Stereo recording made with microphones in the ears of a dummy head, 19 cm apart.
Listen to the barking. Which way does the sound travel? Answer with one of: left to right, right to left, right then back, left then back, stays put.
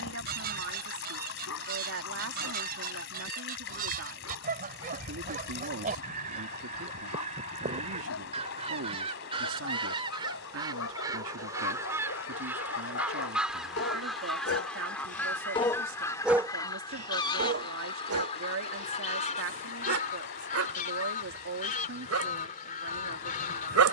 left to right.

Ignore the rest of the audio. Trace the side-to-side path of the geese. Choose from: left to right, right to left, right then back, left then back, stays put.
right to left.